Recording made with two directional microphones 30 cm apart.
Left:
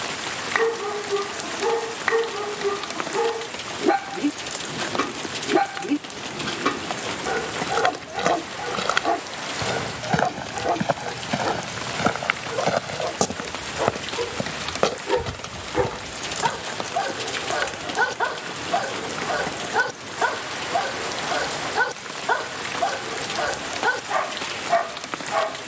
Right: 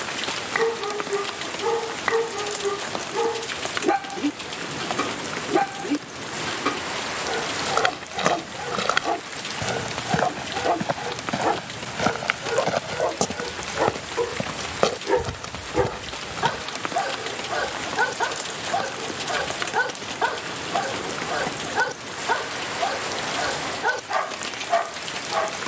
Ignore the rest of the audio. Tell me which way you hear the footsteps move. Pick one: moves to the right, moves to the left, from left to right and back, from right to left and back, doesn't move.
from right to left and back.